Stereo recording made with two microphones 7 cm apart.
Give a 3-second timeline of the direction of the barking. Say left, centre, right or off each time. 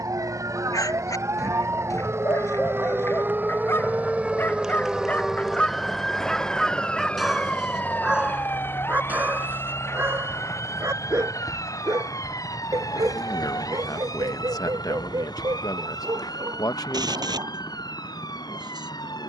left, left, centre, right, right, right, right.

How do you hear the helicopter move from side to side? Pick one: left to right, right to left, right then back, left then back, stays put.
right to left.